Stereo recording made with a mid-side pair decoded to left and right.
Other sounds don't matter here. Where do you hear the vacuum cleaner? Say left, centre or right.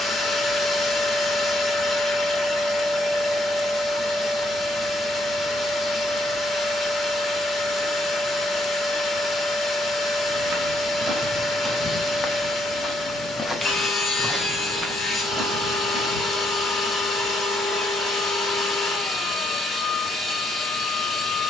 left.